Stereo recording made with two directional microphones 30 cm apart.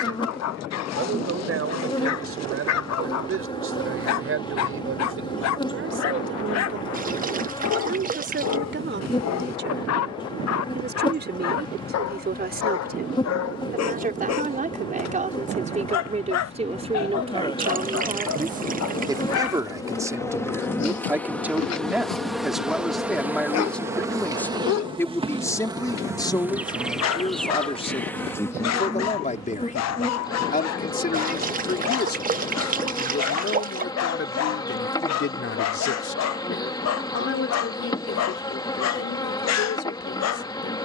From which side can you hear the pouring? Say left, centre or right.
right.